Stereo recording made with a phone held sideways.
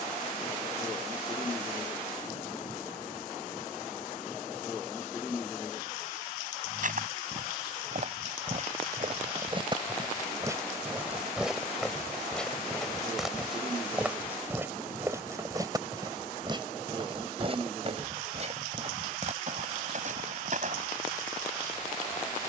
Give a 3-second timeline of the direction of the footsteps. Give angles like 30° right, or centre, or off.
off, off, 50° right, 20° right, centre, 30° right, 50° right, off.